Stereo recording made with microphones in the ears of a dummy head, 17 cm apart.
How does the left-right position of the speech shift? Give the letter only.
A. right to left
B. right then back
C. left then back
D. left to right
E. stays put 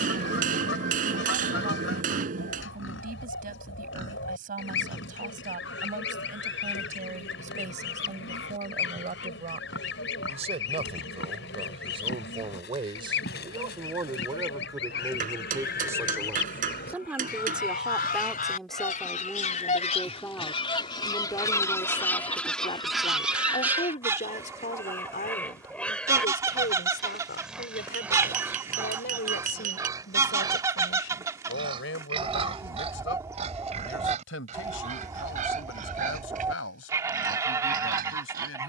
A.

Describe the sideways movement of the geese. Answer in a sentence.
In this clip you hear the geese move from left to right.